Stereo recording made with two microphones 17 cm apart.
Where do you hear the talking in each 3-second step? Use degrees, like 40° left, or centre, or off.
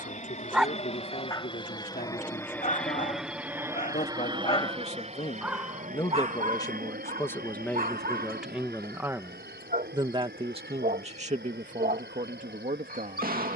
50° left, 40° left, 10° left, 40° right, 60° right.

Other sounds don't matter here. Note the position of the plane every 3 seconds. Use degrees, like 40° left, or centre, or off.
30° left, 30° right, 60° right, 70° right, 80° right.